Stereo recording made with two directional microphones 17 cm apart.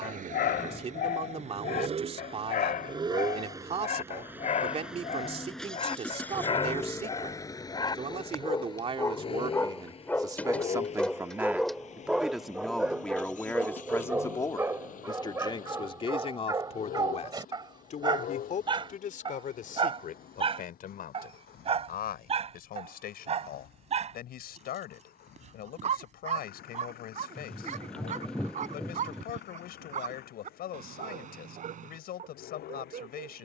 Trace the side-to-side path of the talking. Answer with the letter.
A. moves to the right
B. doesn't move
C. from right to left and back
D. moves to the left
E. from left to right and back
D.